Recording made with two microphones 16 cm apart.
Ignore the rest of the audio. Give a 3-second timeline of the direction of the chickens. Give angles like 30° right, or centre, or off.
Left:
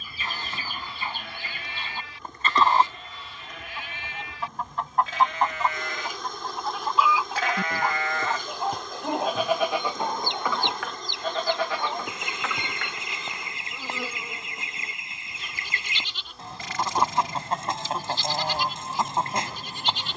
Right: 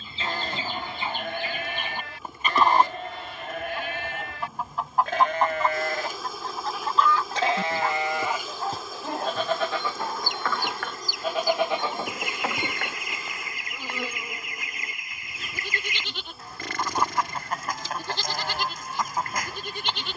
20° right, centre, 10° left, 20° left, 30° left, 30° left, 30° left.